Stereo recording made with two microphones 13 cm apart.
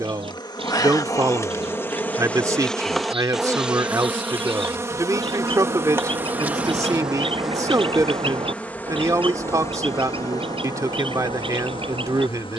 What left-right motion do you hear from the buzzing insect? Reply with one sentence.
In this clip you hear the buzzing insect go right and come back.